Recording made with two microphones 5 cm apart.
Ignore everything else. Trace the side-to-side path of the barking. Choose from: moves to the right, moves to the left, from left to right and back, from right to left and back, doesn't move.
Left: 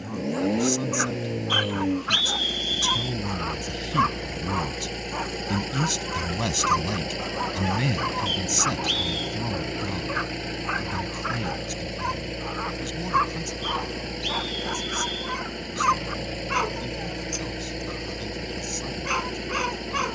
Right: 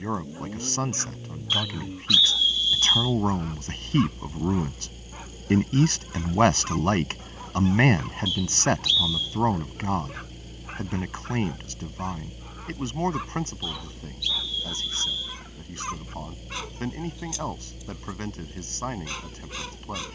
doesn't move.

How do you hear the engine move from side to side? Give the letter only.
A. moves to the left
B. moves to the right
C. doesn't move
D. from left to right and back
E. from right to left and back
C.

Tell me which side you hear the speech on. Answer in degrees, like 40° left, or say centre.
50° right.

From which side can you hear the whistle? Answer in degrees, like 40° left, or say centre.
50° left.